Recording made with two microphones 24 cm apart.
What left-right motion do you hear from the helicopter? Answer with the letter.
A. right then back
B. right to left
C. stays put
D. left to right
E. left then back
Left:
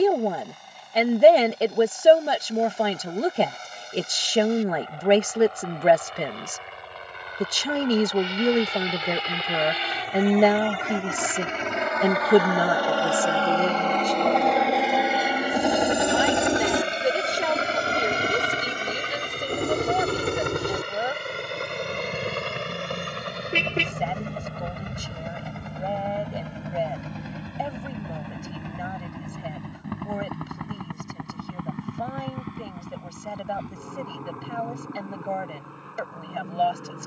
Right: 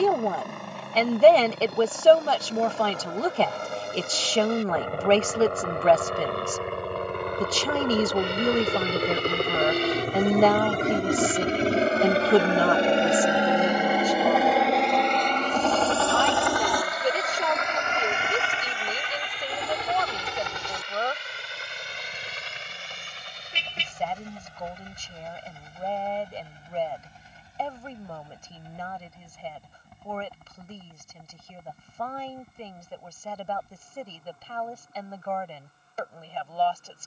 B.